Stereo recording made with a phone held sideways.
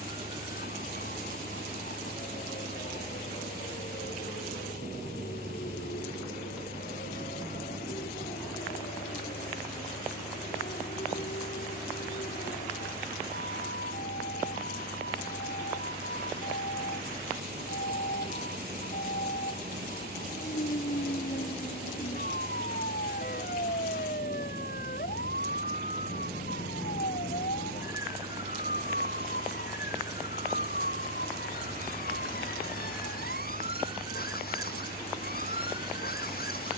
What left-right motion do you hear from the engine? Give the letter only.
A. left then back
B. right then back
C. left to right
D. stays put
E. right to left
D.